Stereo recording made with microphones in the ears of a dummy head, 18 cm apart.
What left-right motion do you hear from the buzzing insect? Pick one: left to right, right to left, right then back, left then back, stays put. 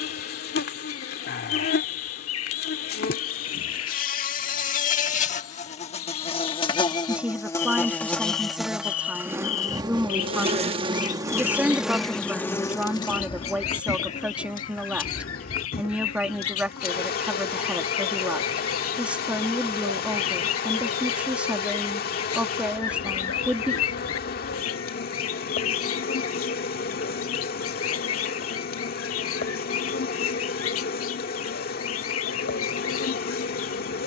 right then back.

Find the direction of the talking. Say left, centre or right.
centre.